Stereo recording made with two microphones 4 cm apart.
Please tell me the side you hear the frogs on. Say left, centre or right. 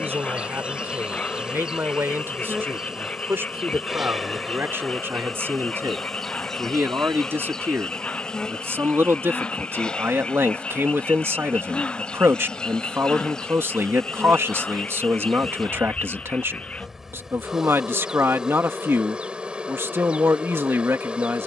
left.